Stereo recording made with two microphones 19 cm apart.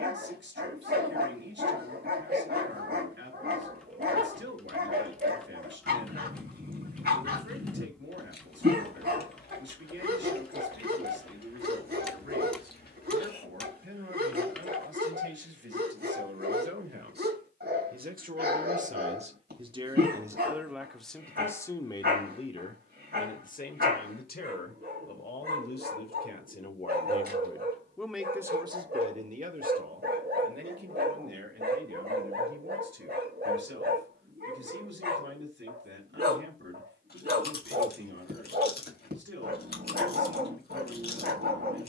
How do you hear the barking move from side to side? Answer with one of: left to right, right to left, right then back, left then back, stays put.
stays put.